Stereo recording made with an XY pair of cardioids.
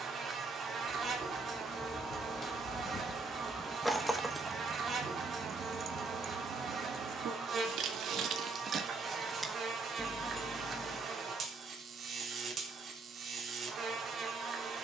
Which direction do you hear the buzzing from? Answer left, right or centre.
right.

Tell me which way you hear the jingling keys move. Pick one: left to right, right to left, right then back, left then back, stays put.
right then back.